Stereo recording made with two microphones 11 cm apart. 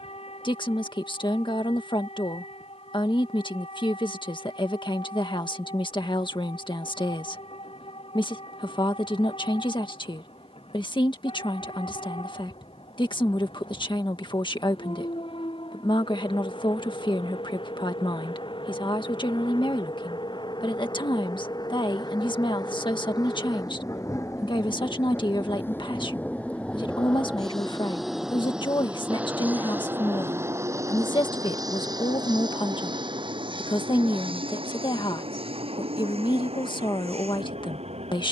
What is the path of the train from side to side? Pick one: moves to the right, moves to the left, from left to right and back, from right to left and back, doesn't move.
moves to the right.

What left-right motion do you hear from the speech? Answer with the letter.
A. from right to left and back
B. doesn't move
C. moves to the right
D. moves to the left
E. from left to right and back
B.